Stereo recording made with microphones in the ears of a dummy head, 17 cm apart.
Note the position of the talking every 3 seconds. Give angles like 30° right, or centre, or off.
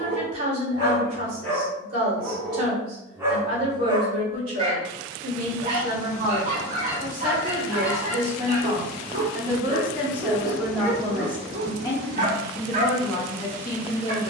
50° right, 50° right, 40° right, centre, 30° left.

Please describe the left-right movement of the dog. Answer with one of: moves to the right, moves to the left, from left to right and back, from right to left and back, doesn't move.
moves to the right.